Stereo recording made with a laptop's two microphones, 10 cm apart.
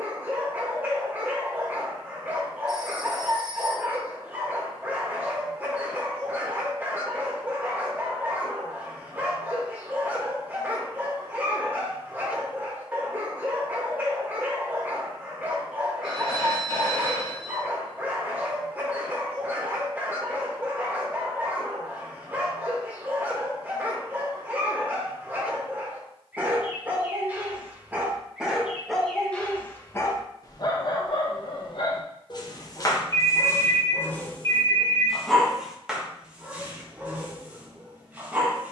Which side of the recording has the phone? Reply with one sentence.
You can hear the phone on the left.